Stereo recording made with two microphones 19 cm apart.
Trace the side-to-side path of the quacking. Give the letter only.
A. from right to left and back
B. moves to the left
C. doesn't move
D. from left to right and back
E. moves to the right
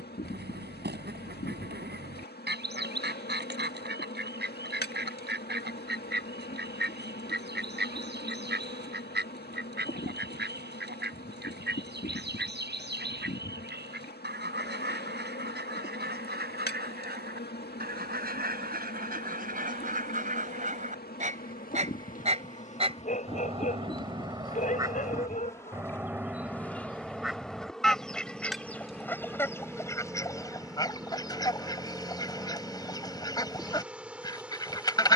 B.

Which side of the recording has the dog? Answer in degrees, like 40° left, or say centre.
40° left.